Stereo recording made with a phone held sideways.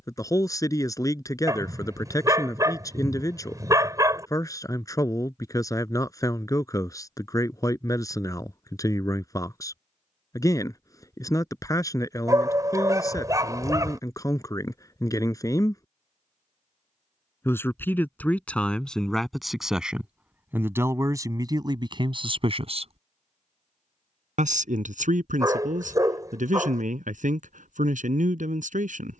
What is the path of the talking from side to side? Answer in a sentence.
You can hear the talking go from the left side to the right.